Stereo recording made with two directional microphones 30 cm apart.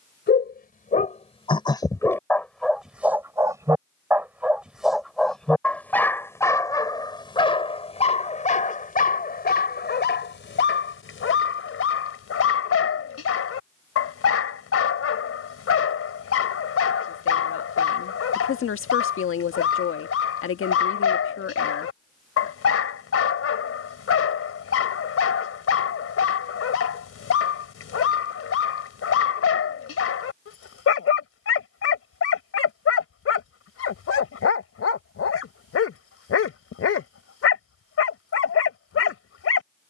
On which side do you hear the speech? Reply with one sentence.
In this clip you hear the speech on the left.